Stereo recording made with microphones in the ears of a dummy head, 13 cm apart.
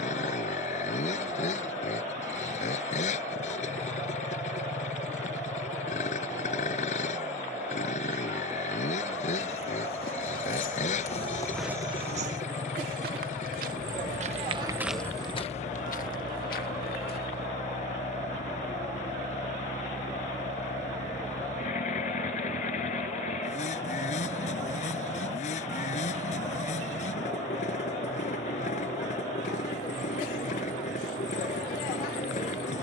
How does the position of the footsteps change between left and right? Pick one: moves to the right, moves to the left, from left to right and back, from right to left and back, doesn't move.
from left to right and back.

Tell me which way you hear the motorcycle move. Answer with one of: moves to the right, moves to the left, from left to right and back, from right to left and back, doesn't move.
doesn't move.